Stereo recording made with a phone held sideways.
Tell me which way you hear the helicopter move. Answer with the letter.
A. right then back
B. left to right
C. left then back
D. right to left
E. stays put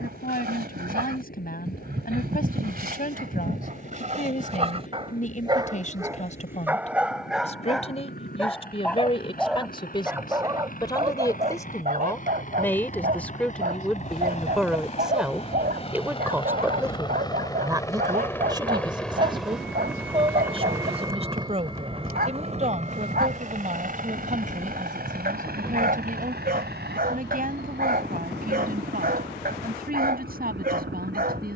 B.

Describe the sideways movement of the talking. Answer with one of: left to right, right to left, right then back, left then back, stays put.
left to right.